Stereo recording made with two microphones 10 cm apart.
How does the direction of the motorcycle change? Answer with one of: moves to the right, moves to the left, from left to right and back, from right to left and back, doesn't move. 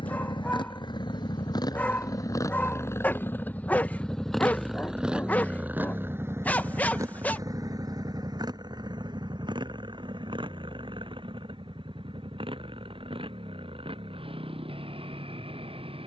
moves to the right.